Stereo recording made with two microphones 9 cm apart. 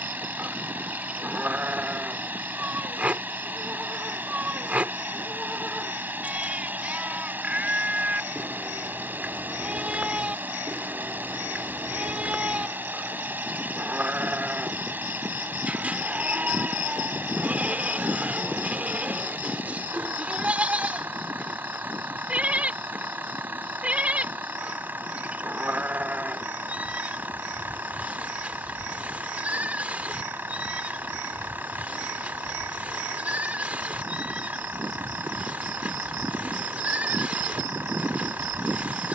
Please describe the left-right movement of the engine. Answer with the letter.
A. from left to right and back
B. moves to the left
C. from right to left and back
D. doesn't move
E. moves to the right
D.